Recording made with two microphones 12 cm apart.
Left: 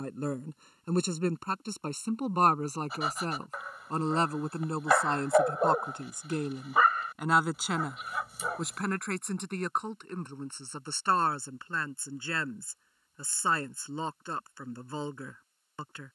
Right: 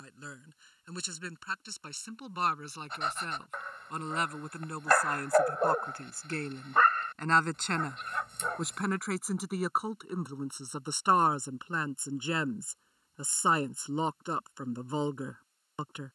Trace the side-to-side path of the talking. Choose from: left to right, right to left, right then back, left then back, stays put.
left to right.